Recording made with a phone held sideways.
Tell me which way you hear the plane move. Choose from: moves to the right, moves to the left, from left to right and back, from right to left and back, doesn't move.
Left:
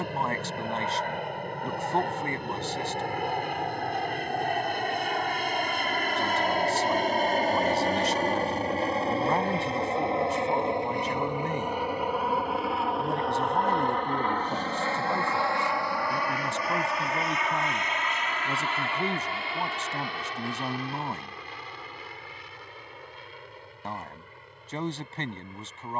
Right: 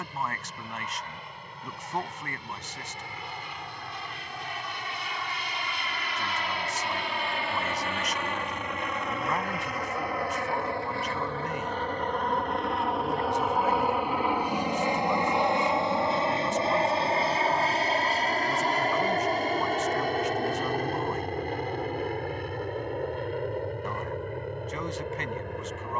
moves to the right.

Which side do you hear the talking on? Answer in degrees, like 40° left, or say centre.
30° left.